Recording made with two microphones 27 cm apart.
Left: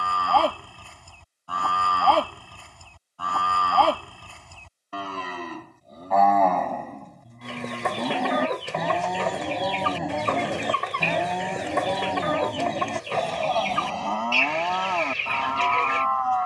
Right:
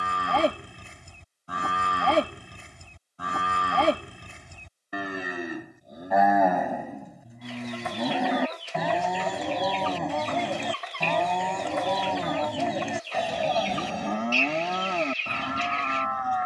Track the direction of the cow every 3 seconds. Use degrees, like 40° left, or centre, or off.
20° right, 20° right, 10° right, centre, 10° right, 20° right.